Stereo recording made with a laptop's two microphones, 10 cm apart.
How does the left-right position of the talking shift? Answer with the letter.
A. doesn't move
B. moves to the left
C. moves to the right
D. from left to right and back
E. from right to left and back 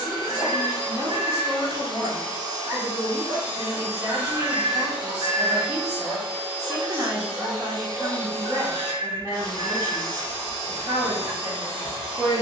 A.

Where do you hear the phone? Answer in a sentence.
You can hear the phone on the right.